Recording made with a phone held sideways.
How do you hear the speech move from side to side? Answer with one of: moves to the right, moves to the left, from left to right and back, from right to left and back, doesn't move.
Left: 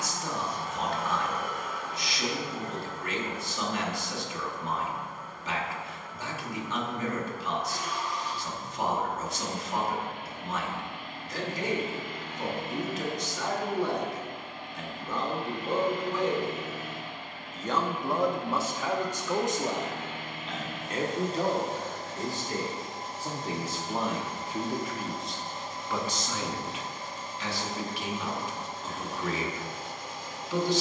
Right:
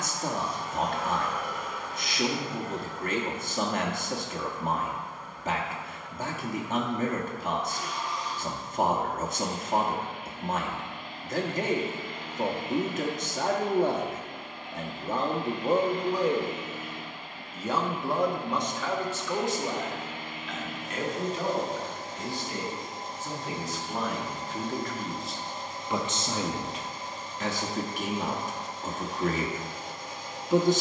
from right to left and back.